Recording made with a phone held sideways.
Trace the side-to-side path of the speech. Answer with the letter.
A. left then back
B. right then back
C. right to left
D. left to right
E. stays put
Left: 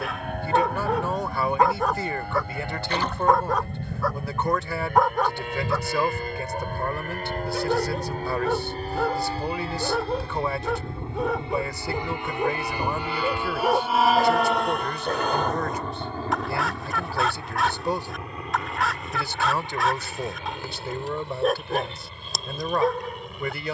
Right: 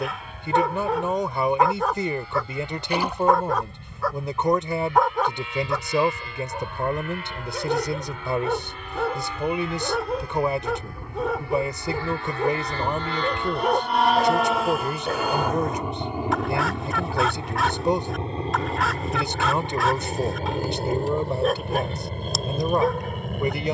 E.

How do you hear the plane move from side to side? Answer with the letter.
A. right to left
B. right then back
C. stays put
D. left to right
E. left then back
D.